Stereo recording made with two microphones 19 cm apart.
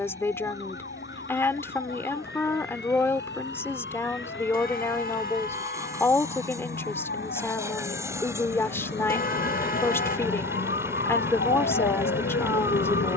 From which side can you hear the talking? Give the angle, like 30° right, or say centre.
10° left.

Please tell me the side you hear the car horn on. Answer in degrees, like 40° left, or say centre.
50° left.